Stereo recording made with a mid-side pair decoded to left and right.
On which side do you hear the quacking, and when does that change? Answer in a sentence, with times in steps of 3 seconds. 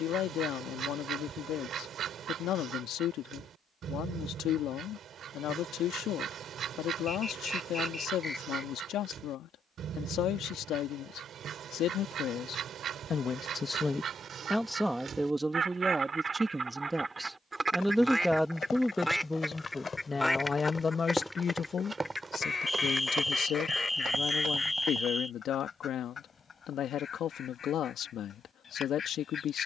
You can hear the quacking on the right from 0 s, in the centre from 18 s and on the left from 21 s.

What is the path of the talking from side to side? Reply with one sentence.
You can hear the talking go right and come back.